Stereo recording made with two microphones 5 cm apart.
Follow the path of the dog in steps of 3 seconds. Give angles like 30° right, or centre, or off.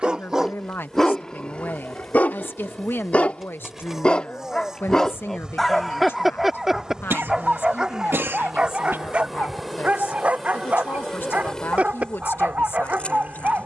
20° left, 20° left, 20° right, 30° right, 40° right.